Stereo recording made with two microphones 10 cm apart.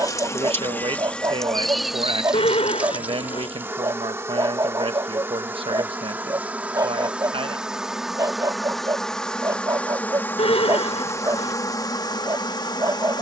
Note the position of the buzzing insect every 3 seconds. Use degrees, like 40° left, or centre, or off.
10° left, 20° right, 10° right, 20° left, 40° left.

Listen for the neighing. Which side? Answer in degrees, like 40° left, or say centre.
80° left.